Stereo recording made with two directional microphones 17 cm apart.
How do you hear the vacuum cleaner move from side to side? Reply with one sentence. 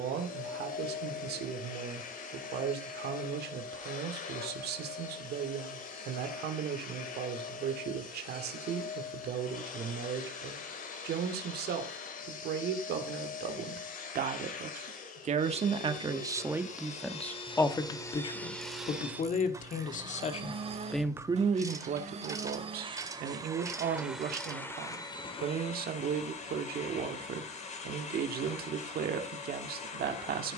You can hear the vacuum cleaner move from left to right and back again.